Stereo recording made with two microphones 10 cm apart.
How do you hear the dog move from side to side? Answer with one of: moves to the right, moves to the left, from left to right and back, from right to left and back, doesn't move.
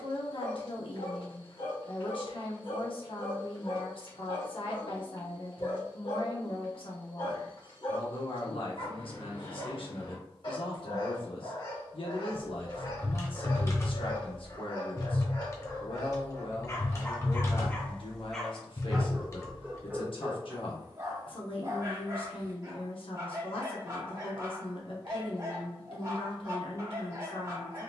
moves to the right.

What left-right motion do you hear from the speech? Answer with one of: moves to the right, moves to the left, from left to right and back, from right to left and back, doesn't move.
doesn't move.